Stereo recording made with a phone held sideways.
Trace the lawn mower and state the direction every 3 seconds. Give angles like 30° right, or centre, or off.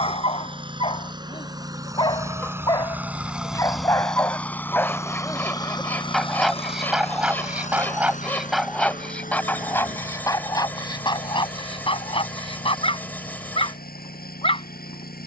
20° right, 10° left, 50° left, 70° left, 80° left.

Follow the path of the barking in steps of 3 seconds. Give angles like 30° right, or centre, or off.
30° left, 20° left, centre, 20° left, 40° left.